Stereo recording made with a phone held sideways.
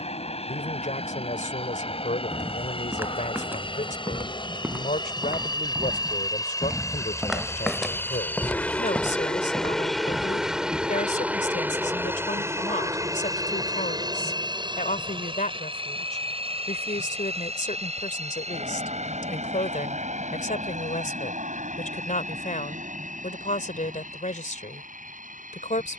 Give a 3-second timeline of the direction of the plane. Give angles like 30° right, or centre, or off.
50° left, 40° left, 20° left, centre, 30° right, 40° right, 50° right, 60° right, 60° right.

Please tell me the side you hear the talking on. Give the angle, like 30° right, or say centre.
70° left.